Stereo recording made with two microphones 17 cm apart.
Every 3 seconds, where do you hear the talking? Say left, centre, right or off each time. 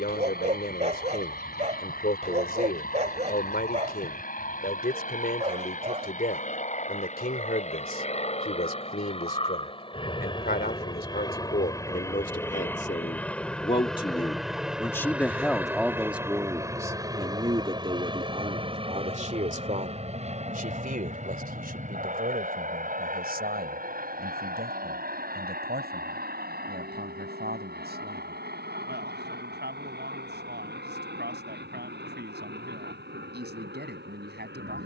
left, left, left, left, left, centre, right, right, right, right, right, right.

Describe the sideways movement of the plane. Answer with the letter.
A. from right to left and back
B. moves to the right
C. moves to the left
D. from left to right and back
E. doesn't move
B.